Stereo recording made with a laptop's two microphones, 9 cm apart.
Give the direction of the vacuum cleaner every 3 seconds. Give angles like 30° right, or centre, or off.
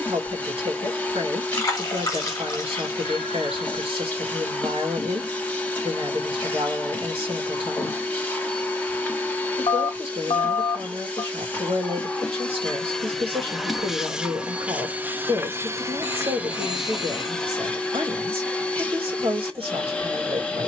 20° left, 20° left, 20° left, 20° left, centre, 10° right, 10° left.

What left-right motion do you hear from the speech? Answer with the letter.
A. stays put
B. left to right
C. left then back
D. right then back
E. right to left
A.